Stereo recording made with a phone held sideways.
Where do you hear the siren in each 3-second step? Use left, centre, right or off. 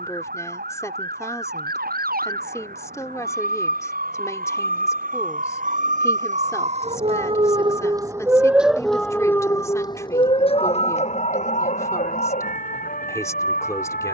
right, right, right, left, left.